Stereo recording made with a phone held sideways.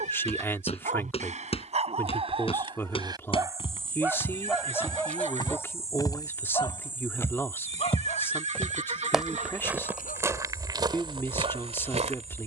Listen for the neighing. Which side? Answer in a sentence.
In this clip you hear the neighing on the right.